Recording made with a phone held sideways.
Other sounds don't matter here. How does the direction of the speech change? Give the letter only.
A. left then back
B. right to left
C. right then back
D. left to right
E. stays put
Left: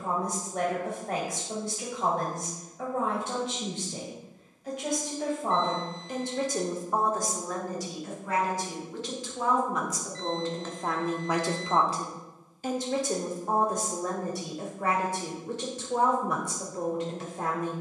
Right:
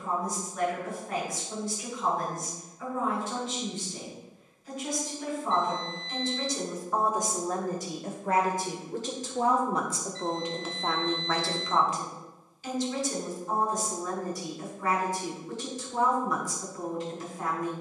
C.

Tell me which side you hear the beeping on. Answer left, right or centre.
left.